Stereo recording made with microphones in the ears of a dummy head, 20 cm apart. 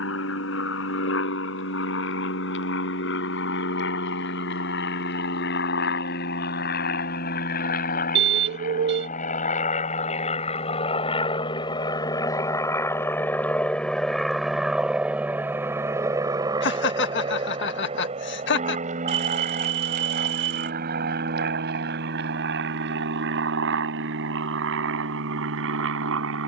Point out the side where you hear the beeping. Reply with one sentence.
In this clip you hear the beeping on the right.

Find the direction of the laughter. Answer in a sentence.
In this clip you hear the laughter on the left.